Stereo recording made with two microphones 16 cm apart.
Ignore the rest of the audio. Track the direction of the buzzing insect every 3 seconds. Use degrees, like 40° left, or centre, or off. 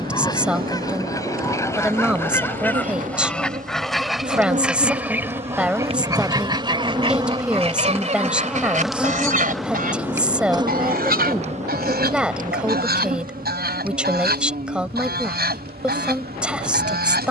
60° right, 50° right, 20° right, 20° right, 60° right, 70° right.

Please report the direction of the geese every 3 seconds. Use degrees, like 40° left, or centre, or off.
20° left, centre, 40° right, 60° right, 80° right, 80° right.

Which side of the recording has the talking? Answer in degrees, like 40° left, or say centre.
10° right.